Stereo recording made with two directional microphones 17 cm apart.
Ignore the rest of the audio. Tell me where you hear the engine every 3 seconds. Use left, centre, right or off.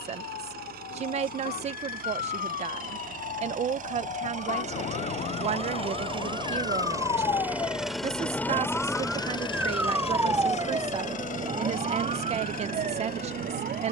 right, right, centre, left, left.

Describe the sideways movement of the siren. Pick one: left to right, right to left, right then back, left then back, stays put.
left to right.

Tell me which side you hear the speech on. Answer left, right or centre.
right.